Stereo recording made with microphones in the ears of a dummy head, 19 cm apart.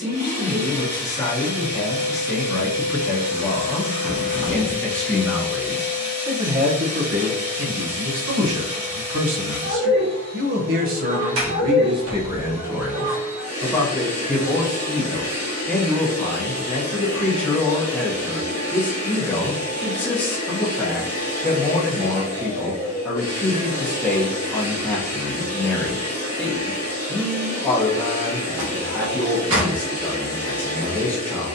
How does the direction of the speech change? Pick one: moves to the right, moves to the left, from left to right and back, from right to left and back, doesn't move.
from left to right and back.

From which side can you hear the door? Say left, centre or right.
right.